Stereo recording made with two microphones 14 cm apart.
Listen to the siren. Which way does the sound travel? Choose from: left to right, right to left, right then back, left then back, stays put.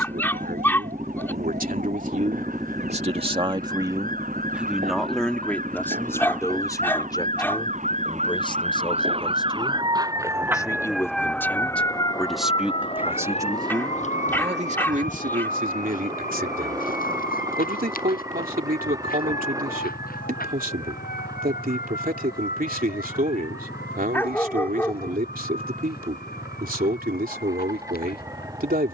right to left.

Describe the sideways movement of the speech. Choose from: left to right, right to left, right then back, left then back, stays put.
left then back.